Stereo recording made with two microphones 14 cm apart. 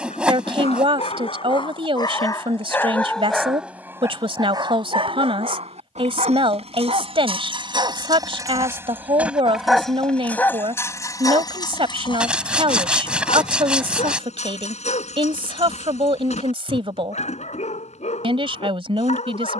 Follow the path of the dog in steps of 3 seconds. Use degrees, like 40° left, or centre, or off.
40° left, 20° right, 40° right, 10° left, 50° left, 50° left, 50° left.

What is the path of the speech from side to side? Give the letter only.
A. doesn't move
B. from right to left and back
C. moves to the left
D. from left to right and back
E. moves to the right
A.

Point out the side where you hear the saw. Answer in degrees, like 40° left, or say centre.
10° right.